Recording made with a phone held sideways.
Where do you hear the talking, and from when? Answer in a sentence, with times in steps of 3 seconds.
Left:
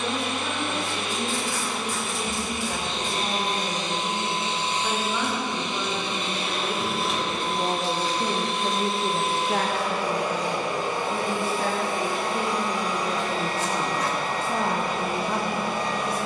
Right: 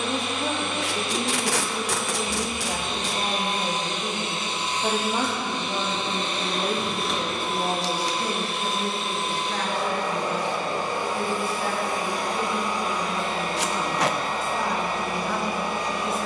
In this clip you hear the talking on the right from 0 s, in the centre from 6 s, on the left from 9 s and in the centre from 15 s.